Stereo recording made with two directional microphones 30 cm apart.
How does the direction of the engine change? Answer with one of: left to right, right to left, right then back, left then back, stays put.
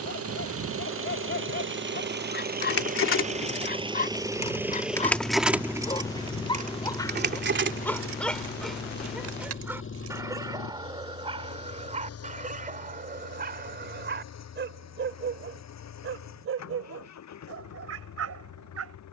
right to left.